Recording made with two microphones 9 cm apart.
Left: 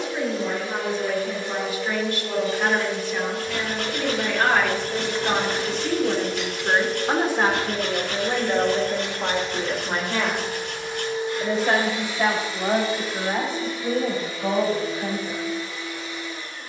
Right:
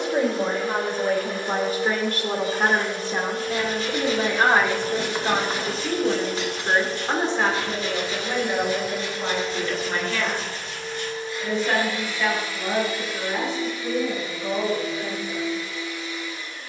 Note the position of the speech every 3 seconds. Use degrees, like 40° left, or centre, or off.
50° right, 20° right, 10° left, 30° left, 50° left, 50° left.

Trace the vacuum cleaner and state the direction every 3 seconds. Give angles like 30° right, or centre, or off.
50° right, 50° right, 30° right, 10° left, 40° left, 40° left.